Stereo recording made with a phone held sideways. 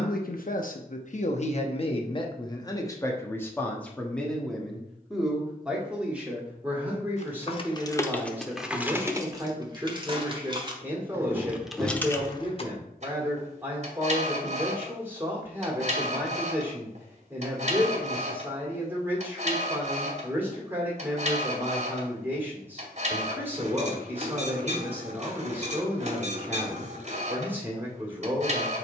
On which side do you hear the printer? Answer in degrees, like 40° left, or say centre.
50° right.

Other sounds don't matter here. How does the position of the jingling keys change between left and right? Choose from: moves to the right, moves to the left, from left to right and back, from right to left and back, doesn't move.
from left to right and back.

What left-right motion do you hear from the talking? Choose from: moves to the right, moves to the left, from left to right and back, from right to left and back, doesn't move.
moves to the right.